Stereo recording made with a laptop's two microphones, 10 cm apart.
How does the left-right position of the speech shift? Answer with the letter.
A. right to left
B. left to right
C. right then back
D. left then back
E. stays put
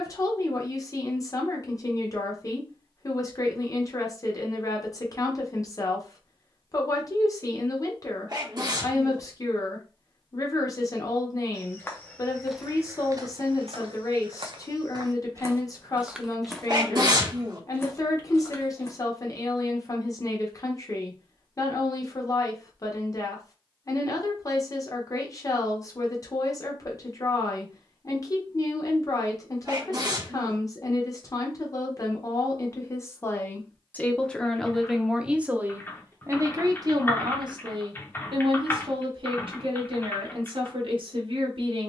B.